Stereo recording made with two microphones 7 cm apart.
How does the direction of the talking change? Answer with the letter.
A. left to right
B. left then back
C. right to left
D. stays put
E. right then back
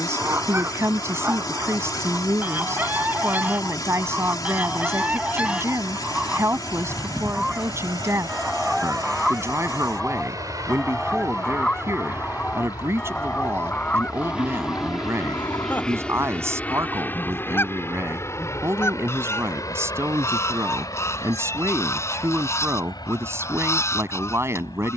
D.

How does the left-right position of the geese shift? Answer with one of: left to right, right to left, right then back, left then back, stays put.
right to left.